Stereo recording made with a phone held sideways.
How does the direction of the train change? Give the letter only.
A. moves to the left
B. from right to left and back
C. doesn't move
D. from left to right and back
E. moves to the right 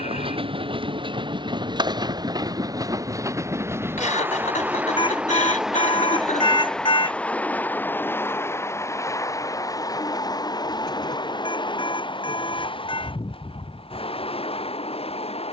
A.